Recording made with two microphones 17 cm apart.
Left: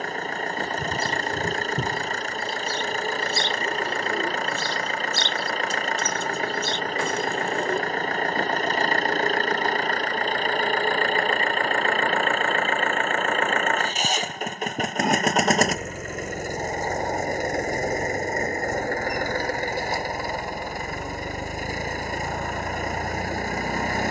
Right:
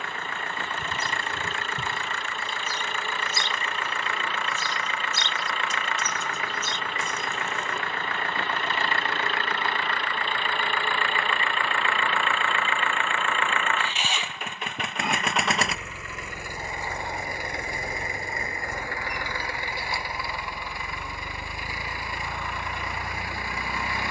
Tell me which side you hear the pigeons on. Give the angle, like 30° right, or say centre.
60° left.